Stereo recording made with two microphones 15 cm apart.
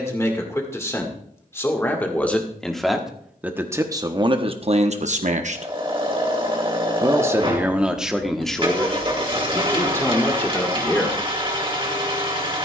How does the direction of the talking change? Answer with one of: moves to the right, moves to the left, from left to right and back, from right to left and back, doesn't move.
from left to right and back.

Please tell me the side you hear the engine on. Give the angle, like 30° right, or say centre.
40° right.